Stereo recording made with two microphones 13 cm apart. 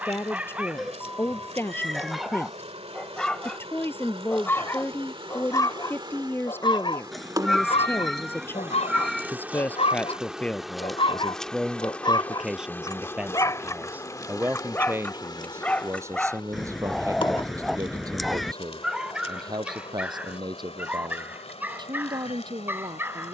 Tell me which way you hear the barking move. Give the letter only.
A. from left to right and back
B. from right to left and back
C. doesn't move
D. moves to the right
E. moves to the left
B.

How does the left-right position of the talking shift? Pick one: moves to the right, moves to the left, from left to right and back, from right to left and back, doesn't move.
moves to the right.